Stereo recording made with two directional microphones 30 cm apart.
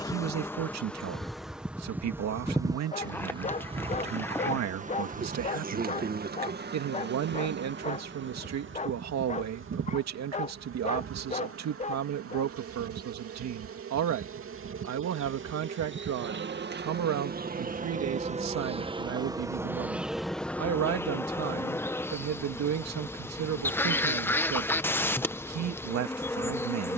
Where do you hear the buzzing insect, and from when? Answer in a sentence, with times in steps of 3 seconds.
You can hear the buzzing insect in the centre from 0 s, on the right from 3 s and in the centre from 18 s.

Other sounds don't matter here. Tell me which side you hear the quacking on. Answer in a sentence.
In this clip you hear the quacking in the centre.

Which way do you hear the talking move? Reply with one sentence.
In this clip you hear the talking stay in one place.